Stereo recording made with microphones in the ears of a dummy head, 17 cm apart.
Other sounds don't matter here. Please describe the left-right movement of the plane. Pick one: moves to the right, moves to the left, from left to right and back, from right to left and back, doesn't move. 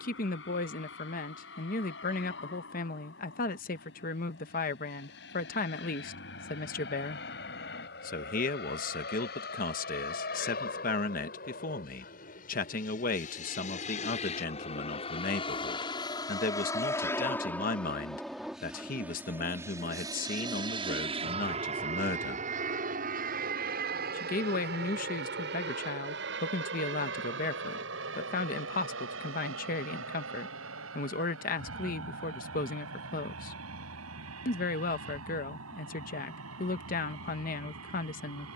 moves to the right.